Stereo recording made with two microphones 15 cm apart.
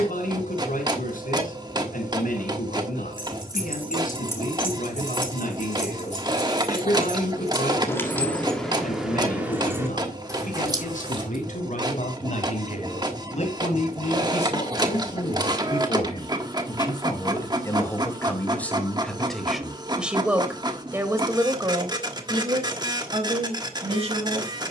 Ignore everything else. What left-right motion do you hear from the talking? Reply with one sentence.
You can hear the talking move to the right.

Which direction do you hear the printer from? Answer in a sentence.
In this clip you hear the printer on the right.